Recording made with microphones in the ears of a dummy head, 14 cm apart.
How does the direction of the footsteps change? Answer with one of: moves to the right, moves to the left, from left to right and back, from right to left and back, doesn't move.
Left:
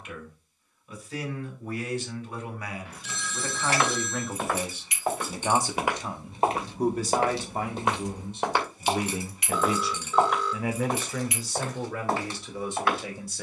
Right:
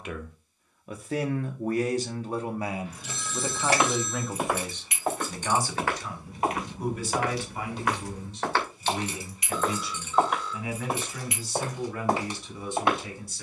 from right to left and back.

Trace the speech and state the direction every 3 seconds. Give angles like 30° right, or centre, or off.
40° right, centre, 30° left, 50° left, 60° left.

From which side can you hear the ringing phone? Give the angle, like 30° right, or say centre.
50° left.